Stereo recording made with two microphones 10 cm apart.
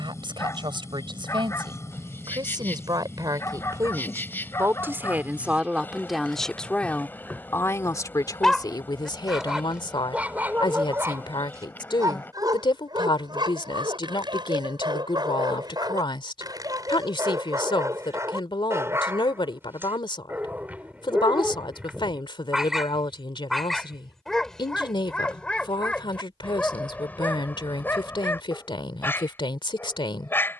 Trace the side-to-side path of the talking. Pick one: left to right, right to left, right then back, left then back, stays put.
right to left.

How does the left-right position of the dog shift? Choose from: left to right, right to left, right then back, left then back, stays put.
right then back.